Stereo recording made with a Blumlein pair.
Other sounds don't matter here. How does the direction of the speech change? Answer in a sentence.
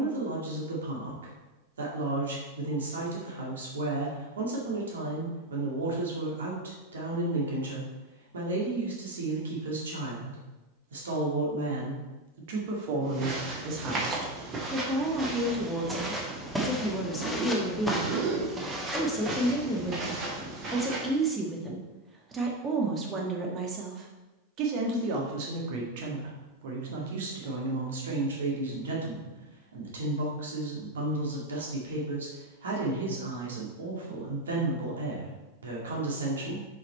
In this clip you hear the speech go left and come back.